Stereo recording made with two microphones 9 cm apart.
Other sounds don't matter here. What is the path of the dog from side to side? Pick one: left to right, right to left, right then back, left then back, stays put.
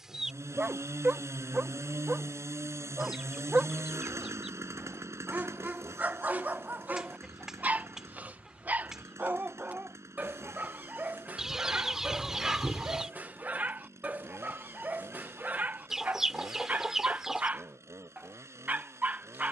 stays put.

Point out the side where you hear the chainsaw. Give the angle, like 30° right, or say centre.
30° right.